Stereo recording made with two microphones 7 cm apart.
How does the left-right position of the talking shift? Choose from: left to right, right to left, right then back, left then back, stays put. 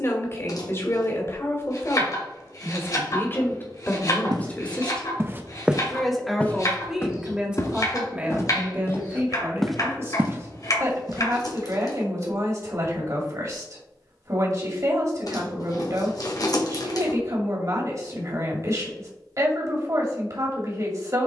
left to right.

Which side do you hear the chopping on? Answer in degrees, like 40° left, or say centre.
50° left.